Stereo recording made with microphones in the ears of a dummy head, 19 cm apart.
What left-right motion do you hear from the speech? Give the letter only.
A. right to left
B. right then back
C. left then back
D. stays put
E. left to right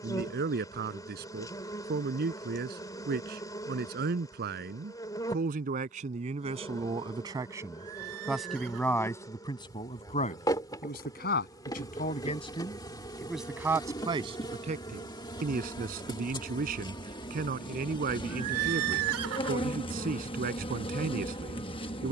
C.